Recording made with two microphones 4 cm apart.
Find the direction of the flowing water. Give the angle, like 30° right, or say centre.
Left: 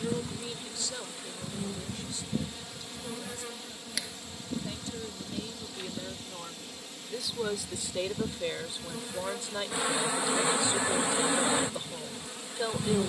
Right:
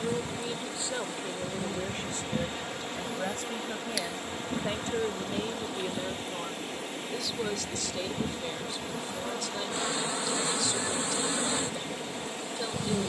50° right.